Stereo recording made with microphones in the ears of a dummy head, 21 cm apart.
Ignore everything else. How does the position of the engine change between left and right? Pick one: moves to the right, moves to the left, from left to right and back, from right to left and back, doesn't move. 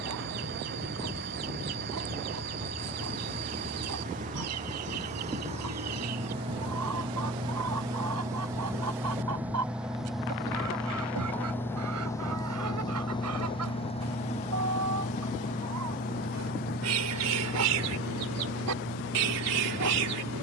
moves to the left.